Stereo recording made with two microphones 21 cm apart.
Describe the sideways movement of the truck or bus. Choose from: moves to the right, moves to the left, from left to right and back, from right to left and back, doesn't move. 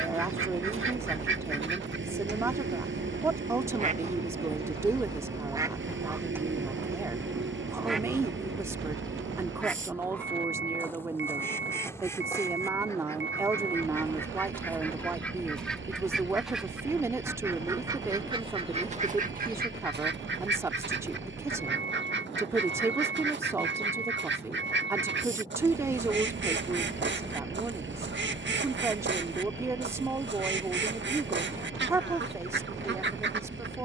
doesn't move.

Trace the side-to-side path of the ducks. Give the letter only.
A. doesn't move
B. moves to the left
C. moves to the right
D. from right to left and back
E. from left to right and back
D.